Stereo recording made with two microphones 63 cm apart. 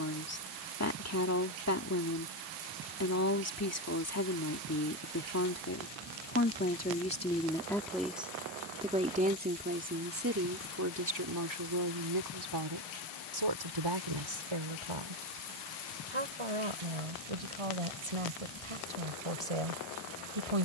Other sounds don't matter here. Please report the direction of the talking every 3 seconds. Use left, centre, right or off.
left, left, centre, right, right, right, right.